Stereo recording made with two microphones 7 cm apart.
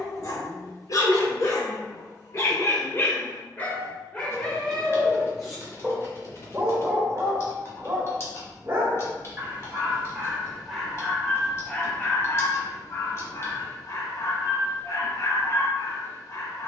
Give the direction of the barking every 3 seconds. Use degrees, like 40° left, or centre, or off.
40° left, 10° left, 20° right, centre, 40° left, 50° left.